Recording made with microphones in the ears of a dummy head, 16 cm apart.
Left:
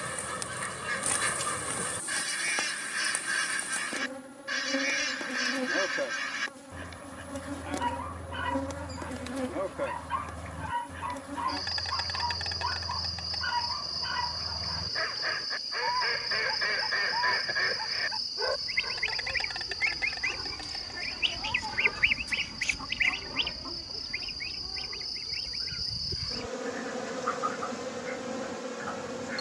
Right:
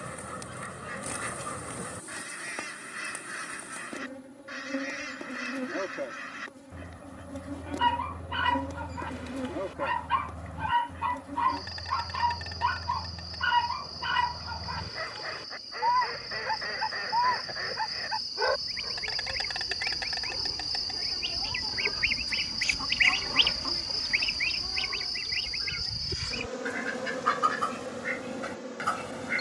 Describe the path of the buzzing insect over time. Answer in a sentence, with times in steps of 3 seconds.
In this clip you hear the buzzing insect on the left from 0 s, in the centre from 18 s, on the right from 21 s, in the centre from 24 s and on the left from 27 s.